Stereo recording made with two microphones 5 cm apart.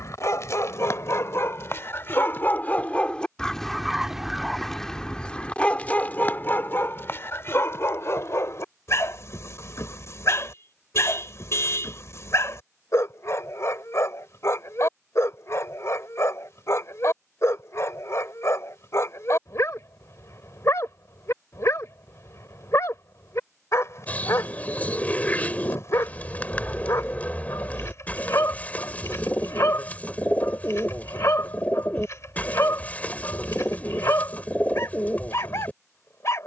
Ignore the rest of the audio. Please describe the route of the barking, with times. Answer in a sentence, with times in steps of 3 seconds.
You can hear the barking on the left from 0 s, in the centre from 3 s and on the left from 6 s.